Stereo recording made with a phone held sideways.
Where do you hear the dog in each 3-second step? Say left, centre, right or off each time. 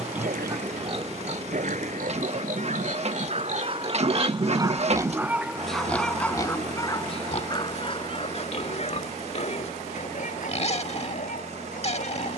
right, right, left, left.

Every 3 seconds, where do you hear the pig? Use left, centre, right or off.
right, right, left, left.